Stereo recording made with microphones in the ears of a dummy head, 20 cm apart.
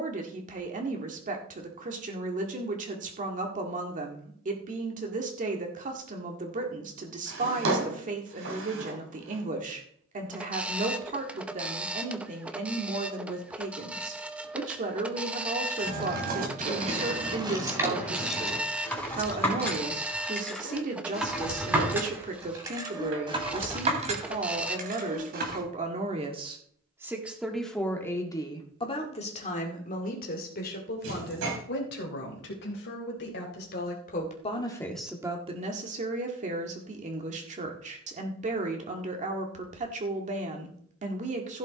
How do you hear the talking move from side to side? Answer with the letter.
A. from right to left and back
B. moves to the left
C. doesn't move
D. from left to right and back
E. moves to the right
A.